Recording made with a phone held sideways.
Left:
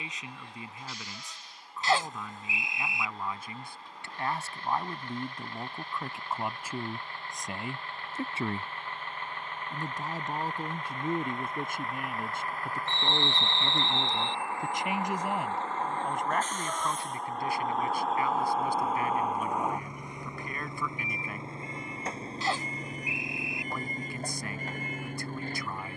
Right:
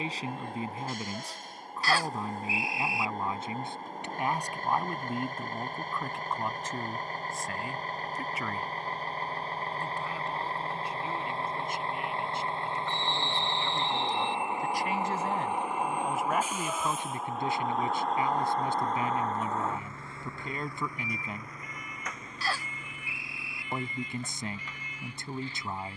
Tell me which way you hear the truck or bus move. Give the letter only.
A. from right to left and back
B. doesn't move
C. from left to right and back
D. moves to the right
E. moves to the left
E.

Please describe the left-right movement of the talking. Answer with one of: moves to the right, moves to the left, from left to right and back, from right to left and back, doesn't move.
from right to left and back.